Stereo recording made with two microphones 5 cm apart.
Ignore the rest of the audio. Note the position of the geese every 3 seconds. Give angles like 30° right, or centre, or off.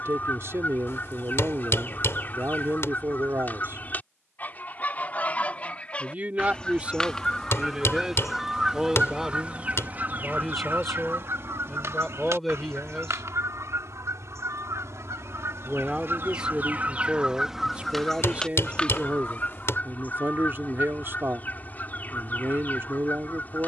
40° left, 30° left, 10° left, 40° right, 70° right, 40° right, 30° left, 40° left.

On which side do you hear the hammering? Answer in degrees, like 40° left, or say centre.
60° left.